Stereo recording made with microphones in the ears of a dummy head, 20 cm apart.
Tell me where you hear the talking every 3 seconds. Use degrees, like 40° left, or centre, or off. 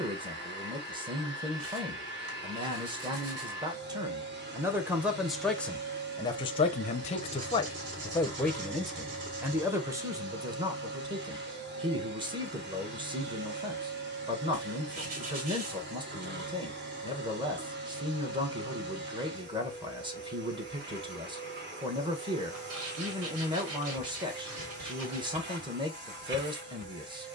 20° right, 10° right, 20° left, 20° right, 20° right, 20° right, 20° right, 20° right, 20° right.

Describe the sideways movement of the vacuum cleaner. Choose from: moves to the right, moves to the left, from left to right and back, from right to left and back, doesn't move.
doesn't move.